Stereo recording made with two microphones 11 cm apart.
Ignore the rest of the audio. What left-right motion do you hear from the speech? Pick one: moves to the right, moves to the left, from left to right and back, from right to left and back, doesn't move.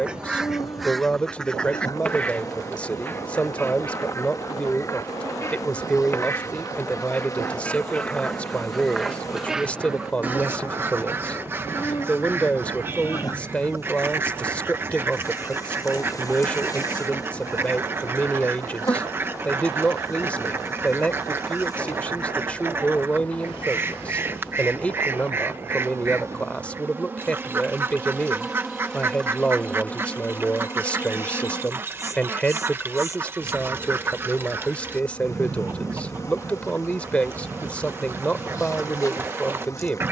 doesn't move.